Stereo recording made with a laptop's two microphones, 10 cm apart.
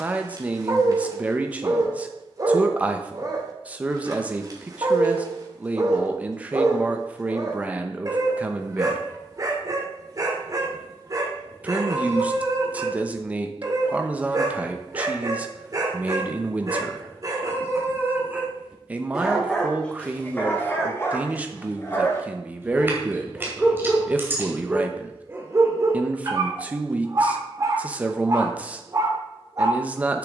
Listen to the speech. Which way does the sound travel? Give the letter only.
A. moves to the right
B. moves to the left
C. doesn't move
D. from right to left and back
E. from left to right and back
C.